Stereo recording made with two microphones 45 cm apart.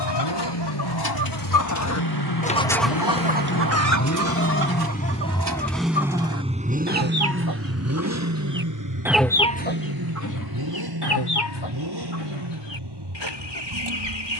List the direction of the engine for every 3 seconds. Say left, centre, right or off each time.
left, left, right, right, right.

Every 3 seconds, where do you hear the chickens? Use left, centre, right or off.
left, right, right, left, left.